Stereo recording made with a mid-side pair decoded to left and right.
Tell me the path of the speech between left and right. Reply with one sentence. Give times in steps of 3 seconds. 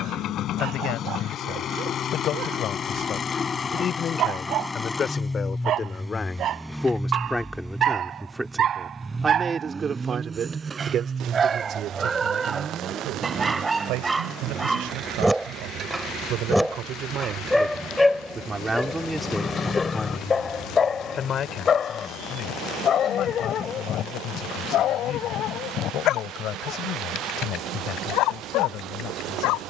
You can hear the speech on the left from 0 s, in the centre from 6 s, on the right from 9 s, in the centre from 18 s and on the left from 21 s.